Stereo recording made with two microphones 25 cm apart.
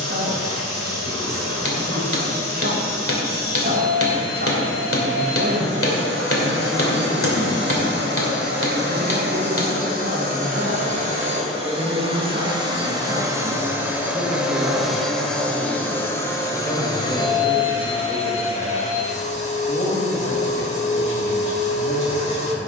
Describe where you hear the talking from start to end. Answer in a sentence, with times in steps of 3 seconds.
In this clip you hear the talking on the right from 0 s, in the centre from 15 s and on the left from 18 s.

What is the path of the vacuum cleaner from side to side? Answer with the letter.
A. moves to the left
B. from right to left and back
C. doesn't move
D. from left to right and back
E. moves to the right
A.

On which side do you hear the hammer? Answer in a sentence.
In this clip you hear the hammer on the left.